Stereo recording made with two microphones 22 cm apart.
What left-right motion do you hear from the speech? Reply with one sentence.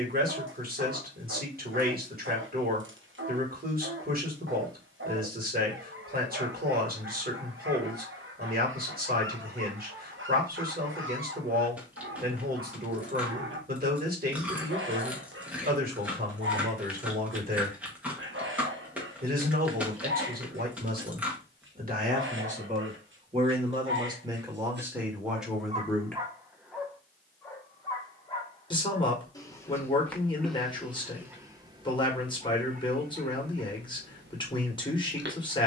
You can hear the speech go from the right side to the left.